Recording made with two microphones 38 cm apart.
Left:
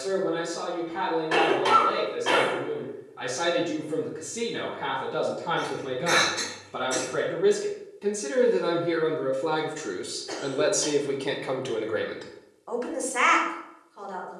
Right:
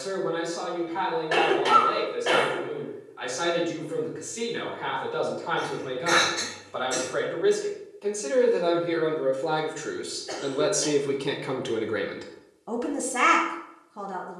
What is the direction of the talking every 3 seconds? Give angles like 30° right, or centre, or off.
60° left, 50° left, 40° left, centre, 50° right.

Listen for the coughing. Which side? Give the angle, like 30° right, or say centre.
20° left.